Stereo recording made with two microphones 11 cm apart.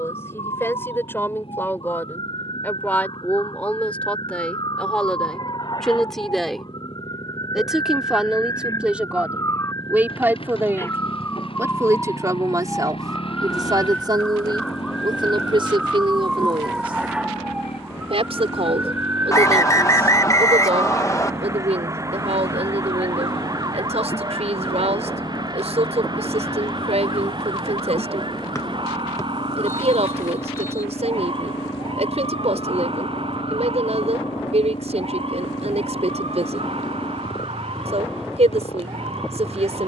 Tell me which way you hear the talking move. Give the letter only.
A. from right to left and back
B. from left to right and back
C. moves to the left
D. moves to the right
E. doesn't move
D.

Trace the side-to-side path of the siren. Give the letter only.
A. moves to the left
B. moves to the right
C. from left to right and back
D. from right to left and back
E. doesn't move
B.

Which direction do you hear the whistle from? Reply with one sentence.
You can hear the whistle on the left.